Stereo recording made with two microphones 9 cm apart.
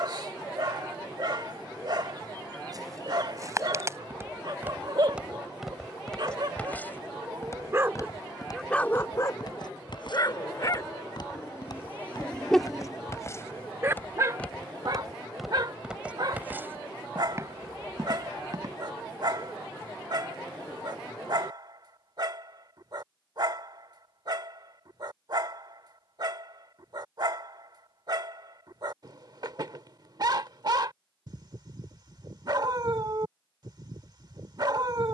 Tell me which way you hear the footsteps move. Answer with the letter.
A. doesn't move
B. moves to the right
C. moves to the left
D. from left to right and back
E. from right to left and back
E.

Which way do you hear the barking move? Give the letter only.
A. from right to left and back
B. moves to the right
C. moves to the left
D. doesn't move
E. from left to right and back
A.